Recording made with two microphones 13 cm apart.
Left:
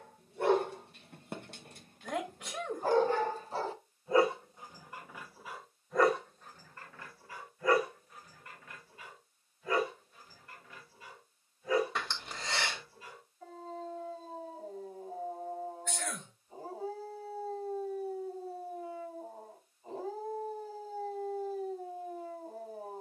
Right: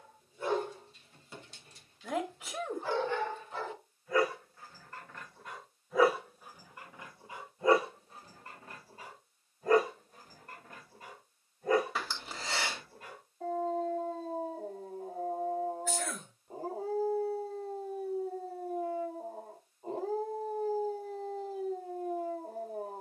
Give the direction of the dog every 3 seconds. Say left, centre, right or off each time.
left, left, right, right, right, right, right, right.